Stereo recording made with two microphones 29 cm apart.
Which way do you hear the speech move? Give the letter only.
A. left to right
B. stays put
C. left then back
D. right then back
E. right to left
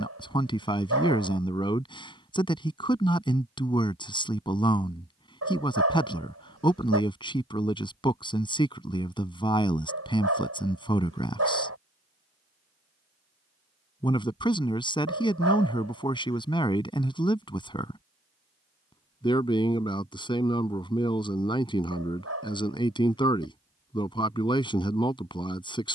B.